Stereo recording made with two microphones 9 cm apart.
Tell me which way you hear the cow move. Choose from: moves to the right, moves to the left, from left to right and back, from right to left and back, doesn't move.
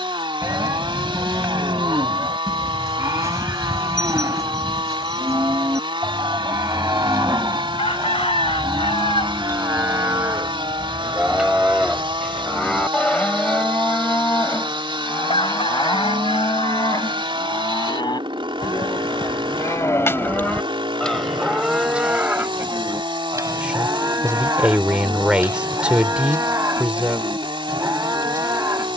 from right to left and back.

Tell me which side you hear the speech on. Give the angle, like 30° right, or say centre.
10° right.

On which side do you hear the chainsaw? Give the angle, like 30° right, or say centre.
70° right.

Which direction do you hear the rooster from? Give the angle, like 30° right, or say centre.
80° left.